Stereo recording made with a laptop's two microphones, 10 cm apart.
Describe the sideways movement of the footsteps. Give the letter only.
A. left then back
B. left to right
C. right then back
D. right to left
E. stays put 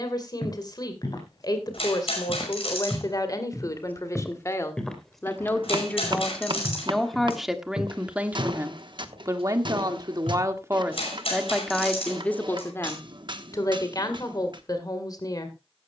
B.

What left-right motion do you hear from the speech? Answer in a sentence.
In this clip you hear the speech move from left to right and back again.